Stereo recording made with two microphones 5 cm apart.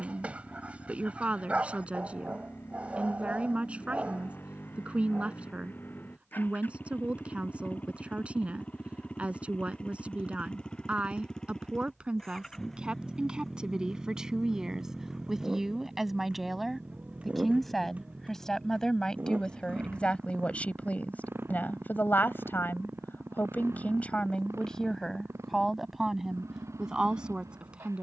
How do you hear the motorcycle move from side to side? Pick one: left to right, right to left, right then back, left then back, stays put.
left to right.